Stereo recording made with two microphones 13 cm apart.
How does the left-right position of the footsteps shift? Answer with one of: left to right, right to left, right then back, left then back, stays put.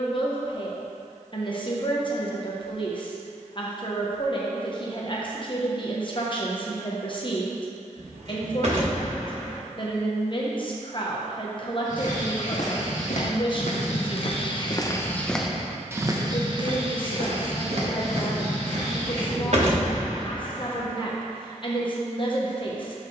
left to right.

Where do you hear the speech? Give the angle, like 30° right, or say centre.
40° left.